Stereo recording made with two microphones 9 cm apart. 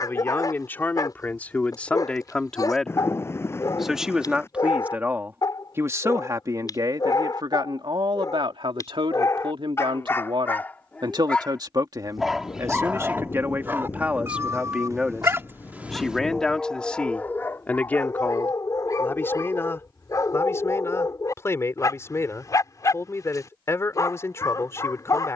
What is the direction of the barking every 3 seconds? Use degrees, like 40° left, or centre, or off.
40° left, 40° left, 40° left, 20° left, 20° right, 10° left, 40° left, 40° left, 40° left.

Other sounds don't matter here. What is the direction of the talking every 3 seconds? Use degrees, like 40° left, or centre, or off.
10° left, 20° right, 50° right, 60° right, 20° right, 10° left, 20° left, 30° left, 30° left.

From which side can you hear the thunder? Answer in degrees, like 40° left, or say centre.
30° left.